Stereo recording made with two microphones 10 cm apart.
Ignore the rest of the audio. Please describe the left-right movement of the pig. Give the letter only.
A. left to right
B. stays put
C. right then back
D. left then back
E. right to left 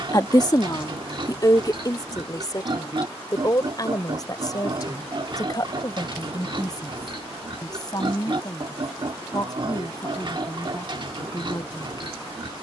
B.